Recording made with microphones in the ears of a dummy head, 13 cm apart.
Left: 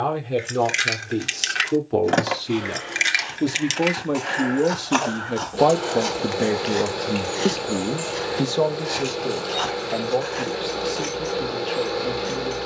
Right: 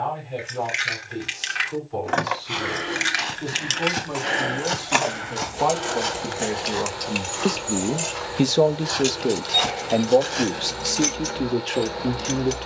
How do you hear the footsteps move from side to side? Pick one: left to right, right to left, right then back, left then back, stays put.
left then back.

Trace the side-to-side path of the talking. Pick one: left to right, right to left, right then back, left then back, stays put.
left to right.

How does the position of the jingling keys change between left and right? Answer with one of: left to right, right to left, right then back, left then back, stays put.
left to right.